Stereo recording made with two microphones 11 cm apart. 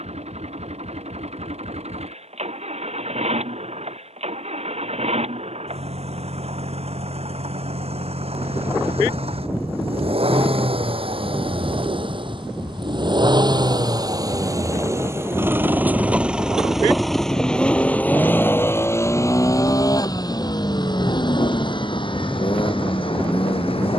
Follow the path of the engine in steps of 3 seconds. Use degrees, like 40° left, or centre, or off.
80° right, 70° right, 70° right, 60° right, 40° right, 10° right, 30° left, 50° left.